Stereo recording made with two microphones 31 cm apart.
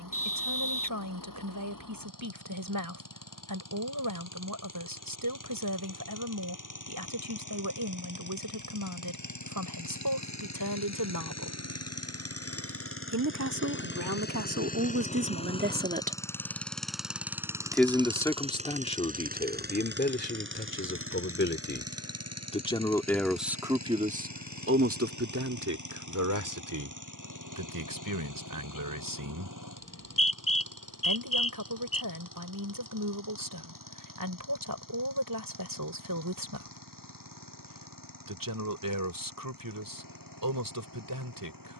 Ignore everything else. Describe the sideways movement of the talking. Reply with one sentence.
In this clip you hear the talking move from right to left and back again.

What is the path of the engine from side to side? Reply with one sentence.
In this clip you hear the engine move to the right.